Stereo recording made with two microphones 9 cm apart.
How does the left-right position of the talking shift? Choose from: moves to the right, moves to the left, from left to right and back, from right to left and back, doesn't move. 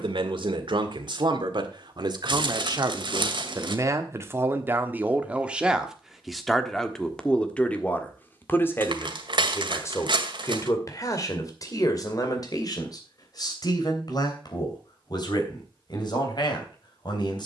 moves to the left.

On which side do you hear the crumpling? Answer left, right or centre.
right.